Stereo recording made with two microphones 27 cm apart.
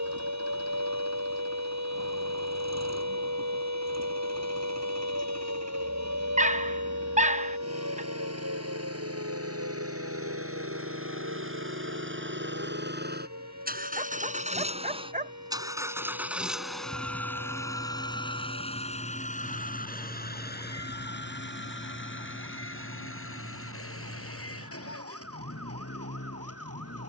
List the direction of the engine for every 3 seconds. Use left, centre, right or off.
right, right, right, right, right, centre, left, left, left.